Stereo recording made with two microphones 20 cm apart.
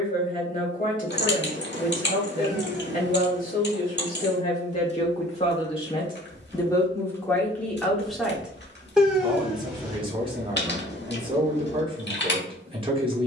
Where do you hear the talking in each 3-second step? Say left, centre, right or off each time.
left, left, centre, right, right.